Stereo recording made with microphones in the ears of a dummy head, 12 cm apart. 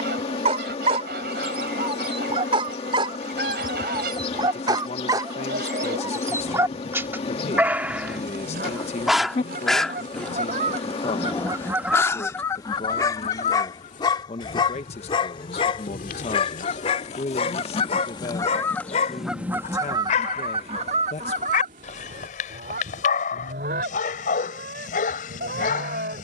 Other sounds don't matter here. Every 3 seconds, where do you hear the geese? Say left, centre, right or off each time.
right, right, right, right, left, left, centre, right, right.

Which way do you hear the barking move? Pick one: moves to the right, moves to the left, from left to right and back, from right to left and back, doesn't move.
moves to the left.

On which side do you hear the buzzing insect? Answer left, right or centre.
left.